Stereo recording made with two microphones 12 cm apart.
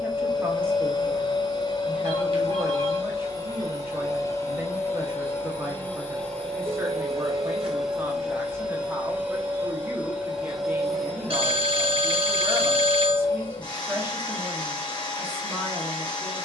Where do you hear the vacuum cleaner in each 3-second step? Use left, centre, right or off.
left, left, centre, centre, left, left.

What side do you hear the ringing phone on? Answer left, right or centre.
right.